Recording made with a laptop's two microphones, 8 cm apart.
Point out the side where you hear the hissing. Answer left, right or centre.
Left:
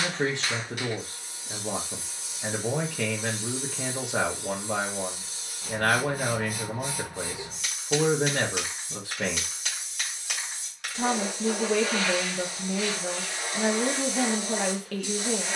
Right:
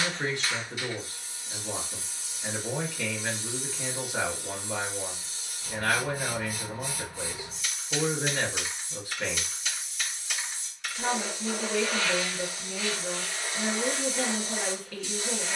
left.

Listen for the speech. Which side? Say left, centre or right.
left.